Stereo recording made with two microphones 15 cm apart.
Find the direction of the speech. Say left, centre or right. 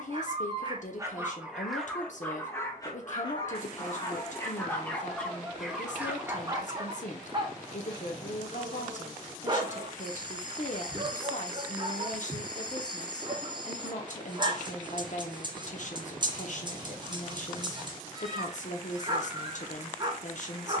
left.